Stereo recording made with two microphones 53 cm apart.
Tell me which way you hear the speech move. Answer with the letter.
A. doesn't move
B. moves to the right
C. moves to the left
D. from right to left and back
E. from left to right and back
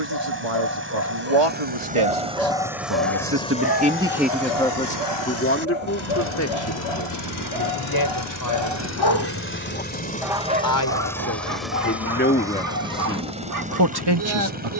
D.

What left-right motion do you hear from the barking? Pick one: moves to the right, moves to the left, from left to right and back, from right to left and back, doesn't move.
from right to left and back.